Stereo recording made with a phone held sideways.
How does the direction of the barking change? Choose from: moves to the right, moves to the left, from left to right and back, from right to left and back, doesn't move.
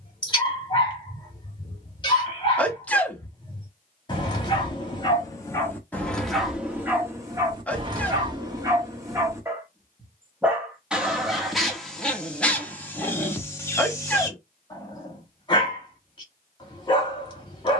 from left to right and back.